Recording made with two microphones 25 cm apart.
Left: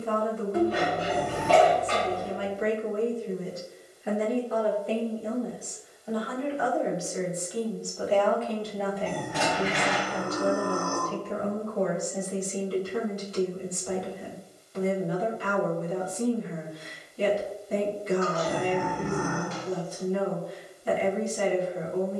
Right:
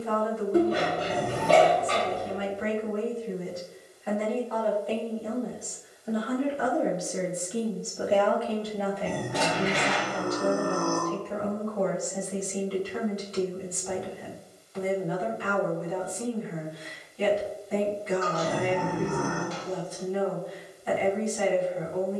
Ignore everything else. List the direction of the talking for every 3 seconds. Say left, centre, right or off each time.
left, left, right, left, left, left, left, left.